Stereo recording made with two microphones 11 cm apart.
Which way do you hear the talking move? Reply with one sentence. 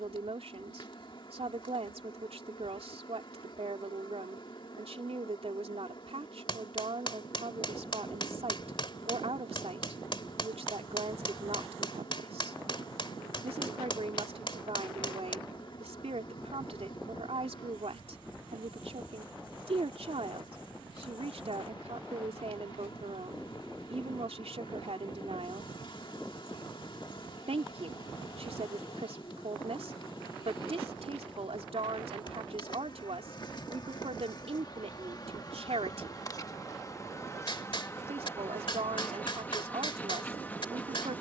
You can hear the talking stay put.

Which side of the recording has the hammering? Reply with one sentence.
You can hear the hammering on the left.